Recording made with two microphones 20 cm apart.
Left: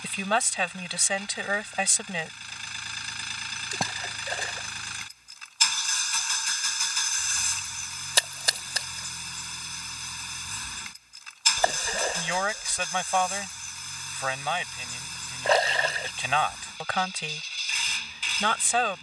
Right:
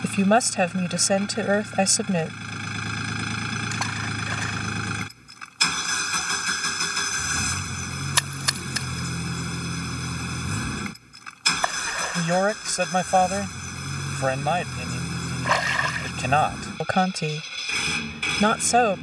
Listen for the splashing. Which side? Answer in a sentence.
You can hear the splashing on the left.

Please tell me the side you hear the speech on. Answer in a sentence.
In this clip you hear the speech on the right.